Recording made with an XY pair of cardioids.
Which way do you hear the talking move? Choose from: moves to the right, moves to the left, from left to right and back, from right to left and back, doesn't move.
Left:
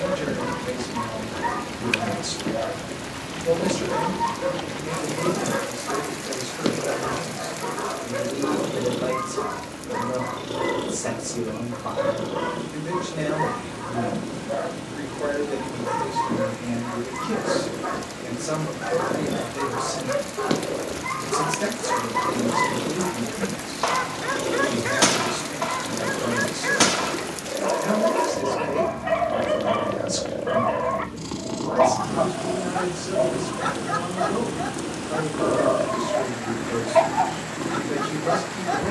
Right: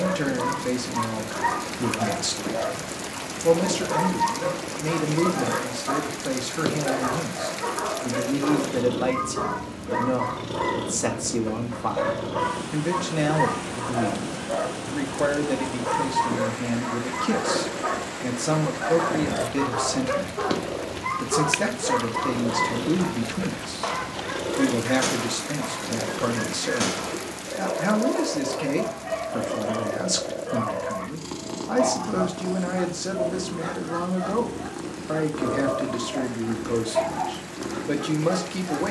doesn't move.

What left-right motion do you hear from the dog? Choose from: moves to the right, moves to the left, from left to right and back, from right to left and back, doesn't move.
moves to the left.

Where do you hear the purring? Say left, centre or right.
centre.